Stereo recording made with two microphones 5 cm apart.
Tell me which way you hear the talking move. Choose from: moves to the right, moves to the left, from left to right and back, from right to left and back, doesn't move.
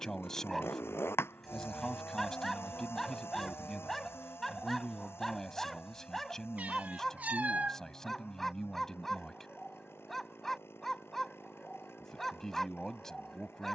doesn't move.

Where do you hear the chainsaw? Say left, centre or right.
left.